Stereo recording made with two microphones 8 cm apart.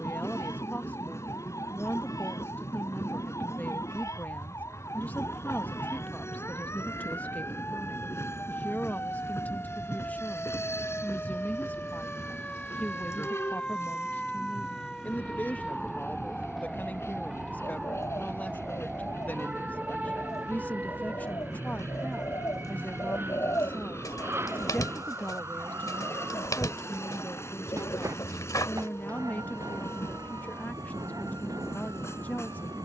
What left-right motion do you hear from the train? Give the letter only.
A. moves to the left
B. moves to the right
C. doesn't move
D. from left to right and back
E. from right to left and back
C.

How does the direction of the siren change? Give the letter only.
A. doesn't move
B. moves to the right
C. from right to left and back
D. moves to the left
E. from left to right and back
B.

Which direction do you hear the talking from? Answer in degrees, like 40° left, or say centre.
20° left.